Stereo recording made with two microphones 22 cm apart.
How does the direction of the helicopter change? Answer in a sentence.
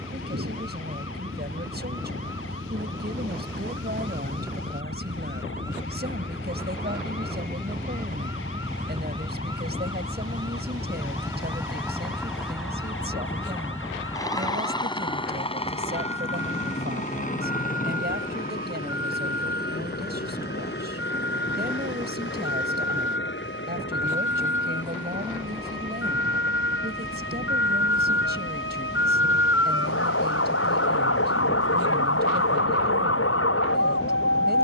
In this clip you hear the helicopter move from right to left.